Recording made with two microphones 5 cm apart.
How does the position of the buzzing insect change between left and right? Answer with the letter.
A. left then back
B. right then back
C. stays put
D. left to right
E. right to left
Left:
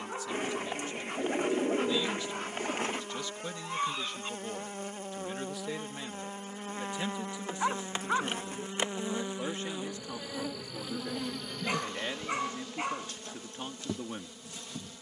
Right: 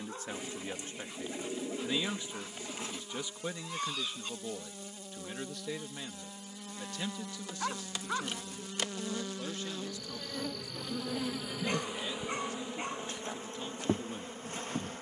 D.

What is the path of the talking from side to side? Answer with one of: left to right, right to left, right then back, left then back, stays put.
right to left.